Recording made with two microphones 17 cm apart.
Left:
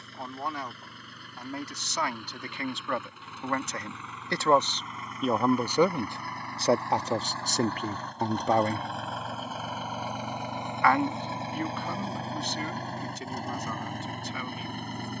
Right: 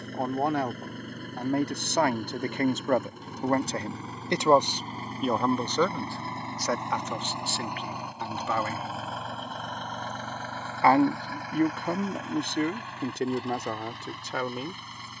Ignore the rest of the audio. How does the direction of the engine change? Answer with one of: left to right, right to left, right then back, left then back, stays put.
right to left.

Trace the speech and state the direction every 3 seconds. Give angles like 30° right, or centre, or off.
50° right, 10° right, 30° left, 40° right, 60° right.